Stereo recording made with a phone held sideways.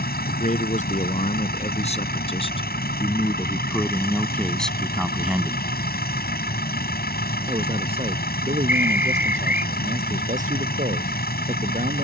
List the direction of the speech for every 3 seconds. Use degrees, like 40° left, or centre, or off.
50° left, 10° left, 40° right, 50° right.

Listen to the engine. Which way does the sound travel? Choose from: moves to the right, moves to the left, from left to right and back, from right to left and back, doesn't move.
doesn't move.